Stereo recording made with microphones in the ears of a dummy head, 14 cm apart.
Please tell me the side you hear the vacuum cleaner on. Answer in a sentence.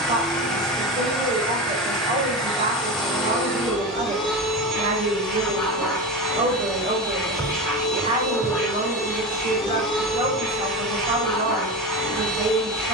You can hear the vacuum cleaner in the centre.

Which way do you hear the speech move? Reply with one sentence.
You can hear the speech stay put.